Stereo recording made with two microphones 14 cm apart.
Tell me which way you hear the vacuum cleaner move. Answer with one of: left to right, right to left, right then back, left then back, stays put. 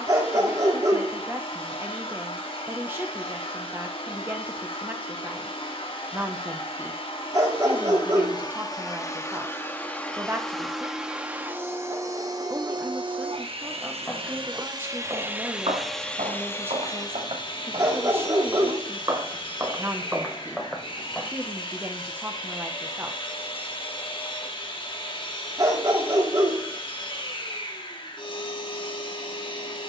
right then back.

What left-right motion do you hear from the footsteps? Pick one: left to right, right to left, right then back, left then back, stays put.
right then back.